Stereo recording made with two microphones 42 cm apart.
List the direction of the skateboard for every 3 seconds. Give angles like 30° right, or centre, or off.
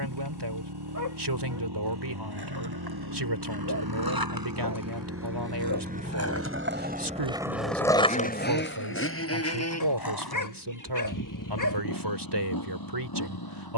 70° right, 50° right, centre, 50° left, off.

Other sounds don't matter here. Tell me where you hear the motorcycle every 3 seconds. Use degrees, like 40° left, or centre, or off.
70° right, 40° right, 10° left, 40° left, 50° left.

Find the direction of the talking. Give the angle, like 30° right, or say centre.
70° right.